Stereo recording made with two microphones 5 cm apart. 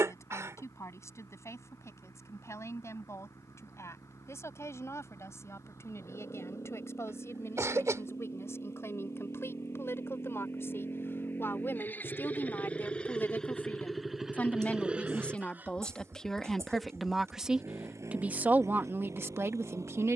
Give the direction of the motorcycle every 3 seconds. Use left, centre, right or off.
left, left, left, left, centre, right, right.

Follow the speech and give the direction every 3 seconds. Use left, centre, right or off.
left, left, left, left, left, centre, right.